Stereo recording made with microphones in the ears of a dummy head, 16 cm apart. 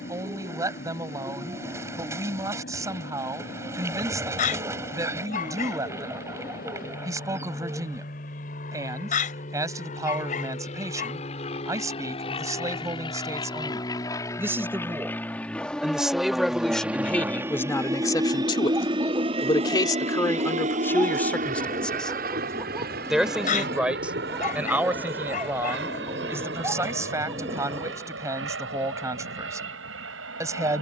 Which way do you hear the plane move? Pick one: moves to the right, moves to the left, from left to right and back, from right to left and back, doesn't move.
moves to the right.